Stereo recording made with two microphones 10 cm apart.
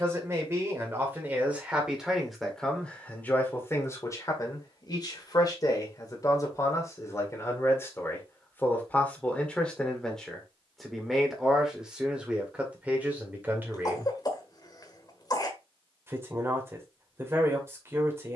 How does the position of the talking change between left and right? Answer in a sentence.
In this clip you hear the talking go left and come back.